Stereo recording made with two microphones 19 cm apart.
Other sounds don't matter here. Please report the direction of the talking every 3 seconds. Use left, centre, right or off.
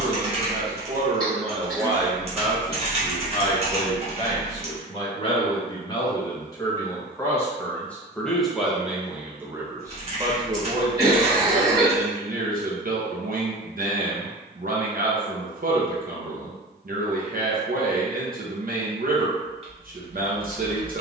right, left, centre, right, right, right, right.